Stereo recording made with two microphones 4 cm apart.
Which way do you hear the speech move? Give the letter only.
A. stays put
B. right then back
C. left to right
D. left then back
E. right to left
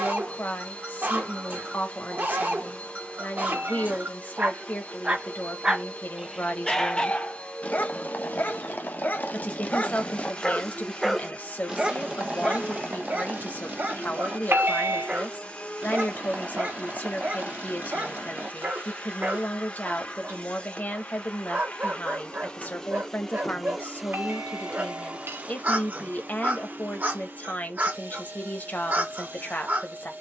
A.